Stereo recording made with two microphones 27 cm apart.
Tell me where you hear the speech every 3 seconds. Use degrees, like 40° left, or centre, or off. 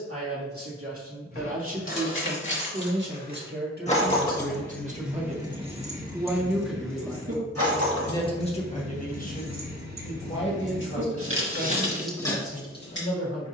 50° right, 30° right, 10° left, 40° left, 60° left.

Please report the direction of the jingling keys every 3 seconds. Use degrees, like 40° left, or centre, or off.
50° left, 10° left, 60° right, 60° right, 20° left.